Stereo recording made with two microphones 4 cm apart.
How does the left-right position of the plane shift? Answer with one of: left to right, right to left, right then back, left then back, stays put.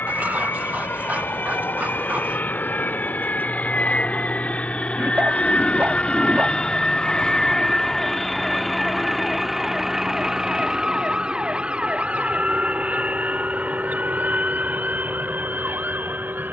left to right.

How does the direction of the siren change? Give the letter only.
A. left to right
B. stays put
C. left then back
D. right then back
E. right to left
A.